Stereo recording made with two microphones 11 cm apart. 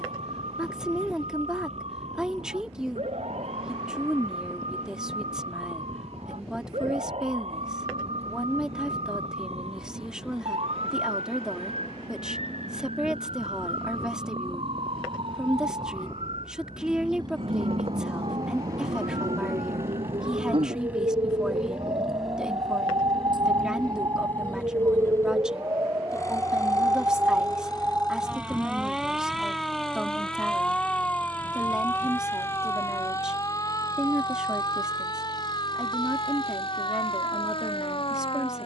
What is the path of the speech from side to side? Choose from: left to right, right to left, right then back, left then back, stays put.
stays put.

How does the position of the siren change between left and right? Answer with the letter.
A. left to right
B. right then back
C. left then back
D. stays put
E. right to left
E.